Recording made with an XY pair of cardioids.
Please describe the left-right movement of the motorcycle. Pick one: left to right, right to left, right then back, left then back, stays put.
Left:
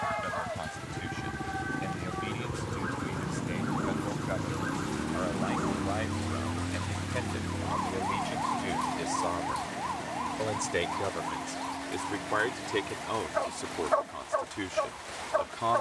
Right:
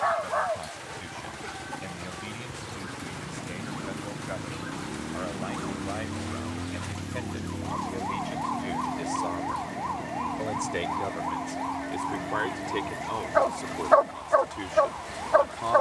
left to right.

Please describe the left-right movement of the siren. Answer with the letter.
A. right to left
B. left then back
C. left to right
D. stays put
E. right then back
C.